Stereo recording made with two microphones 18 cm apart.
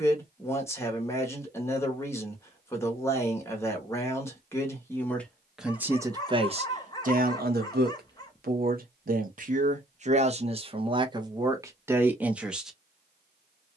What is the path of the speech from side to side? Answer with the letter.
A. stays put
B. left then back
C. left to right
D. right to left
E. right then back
E.